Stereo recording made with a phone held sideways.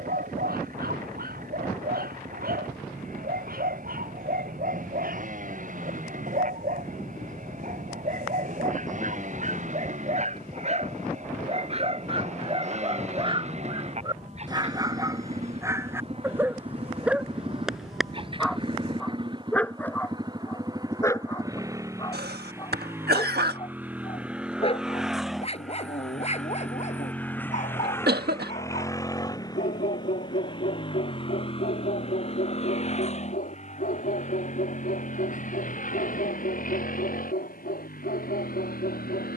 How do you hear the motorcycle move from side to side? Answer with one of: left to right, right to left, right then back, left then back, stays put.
right to left.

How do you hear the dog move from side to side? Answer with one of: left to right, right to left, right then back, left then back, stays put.
right to left.